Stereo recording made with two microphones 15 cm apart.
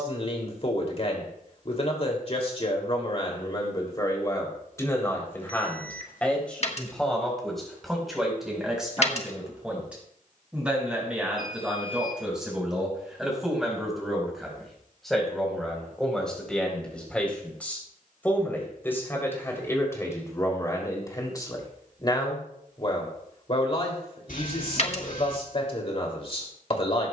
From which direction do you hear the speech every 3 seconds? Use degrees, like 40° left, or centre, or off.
40° left, 20° left, centre, 10° right, centre, 10° left, 20° left, 30° left, 40° left.